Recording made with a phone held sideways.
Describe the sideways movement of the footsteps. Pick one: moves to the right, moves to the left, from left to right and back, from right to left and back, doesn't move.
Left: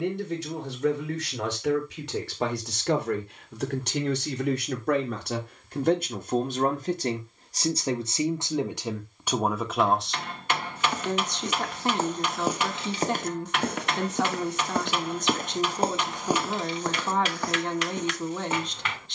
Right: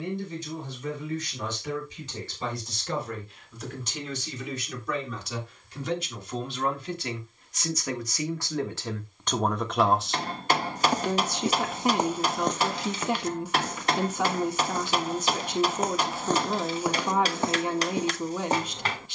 from right to left and back.